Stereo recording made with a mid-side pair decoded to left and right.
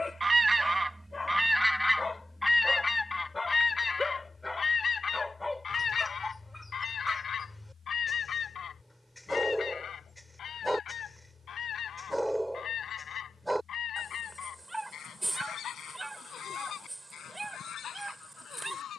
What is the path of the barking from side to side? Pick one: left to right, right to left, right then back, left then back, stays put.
left to right.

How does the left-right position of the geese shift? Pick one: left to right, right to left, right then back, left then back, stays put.
right to left.